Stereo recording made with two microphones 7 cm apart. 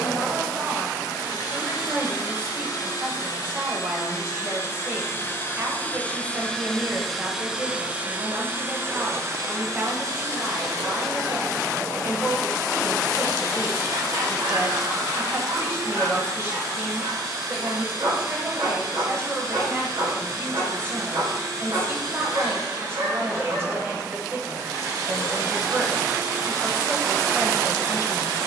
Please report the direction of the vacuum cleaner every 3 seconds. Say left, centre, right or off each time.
left, left, centre, right, right, right, right, right, right, right.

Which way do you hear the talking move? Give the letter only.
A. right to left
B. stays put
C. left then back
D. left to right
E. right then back
B.